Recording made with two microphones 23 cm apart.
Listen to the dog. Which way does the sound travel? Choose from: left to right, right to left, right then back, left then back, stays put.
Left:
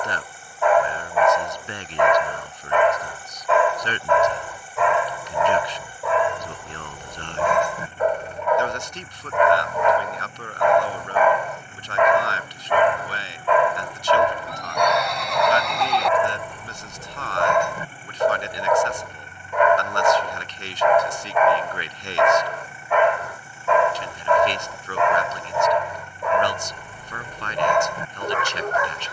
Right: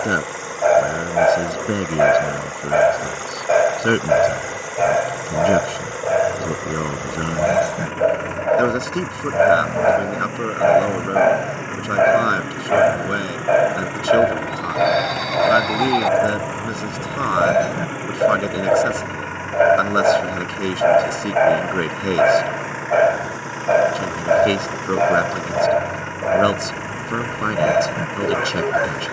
stays put.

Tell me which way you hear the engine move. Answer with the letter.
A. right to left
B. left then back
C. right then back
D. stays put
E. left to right
D.